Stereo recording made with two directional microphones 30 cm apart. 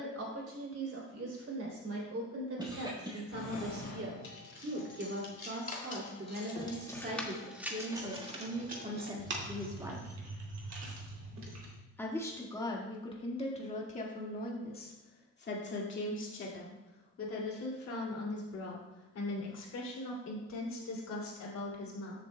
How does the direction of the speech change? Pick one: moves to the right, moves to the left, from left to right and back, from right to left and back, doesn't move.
moves to the left.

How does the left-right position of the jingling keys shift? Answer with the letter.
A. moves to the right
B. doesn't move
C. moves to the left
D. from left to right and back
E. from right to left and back
A.